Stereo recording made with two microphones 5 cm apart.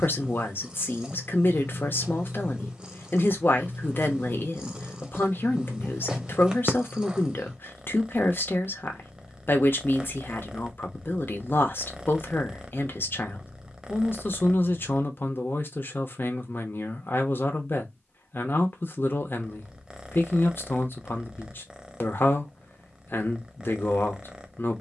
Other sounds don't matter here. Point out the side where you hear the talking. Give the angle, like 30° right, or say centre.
50° left.